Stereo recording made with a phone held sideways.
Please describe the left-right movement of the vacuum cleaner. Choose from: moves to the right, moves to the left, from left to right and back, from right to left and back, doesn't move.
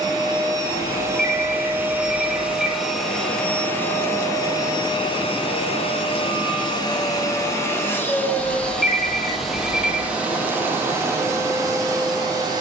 from right to left and back.